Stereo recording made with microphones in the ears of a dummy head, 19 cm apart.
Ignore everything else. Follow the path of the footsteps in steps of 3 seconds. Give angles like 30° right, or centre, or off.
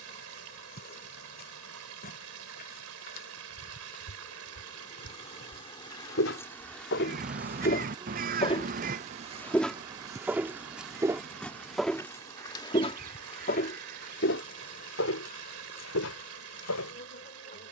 off, 80° left, 50° left, centre, 40° left, 80° left.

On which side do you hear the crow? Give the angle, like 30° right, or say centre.
40° right.